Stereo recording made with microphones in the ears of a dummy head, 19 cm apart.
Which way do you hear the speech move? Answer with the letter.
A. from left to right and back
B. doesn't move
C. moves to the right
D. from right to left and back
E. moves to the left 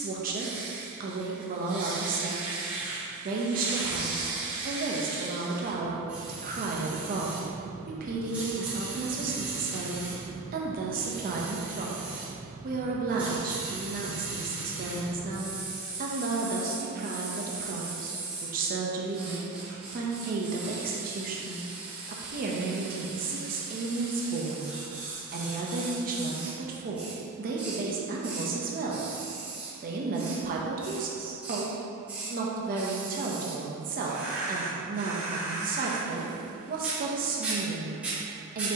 B.